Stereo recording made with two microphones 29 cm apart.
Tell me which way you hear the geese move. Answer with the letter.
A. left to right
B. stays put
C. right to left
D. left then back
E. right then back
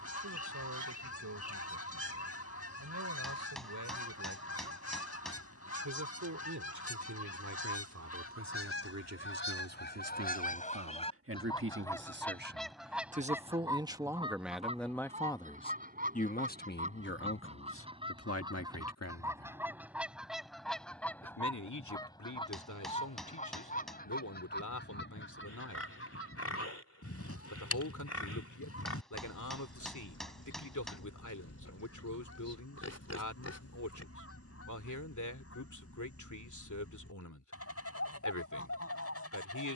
E.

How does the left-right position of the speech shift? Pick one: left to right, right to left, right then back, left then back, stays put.
right to left.